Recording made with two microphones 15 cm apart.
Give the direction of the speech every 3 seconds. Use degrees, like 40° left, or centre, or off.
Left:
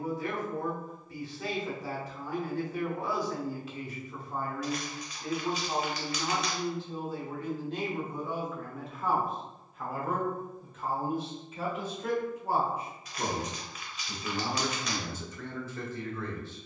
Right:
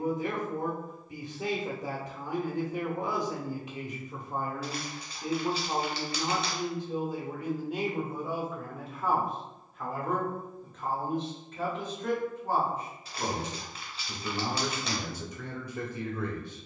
20° right, 20° right, 10° right, 10° left, 10° left, 10° right.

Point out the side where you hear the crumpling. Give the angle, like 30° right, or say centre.
30° right.